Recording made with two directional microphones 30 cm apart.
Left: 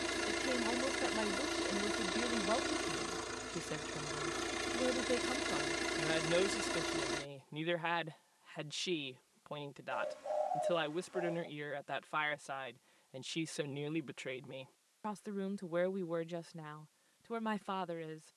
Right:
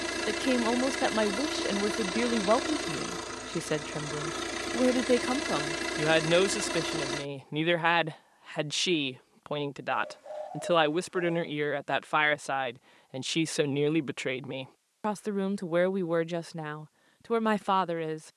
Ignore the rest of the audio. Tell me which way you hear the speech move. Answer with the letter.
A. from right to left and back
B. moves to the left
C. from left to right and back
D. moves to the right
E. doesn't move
E.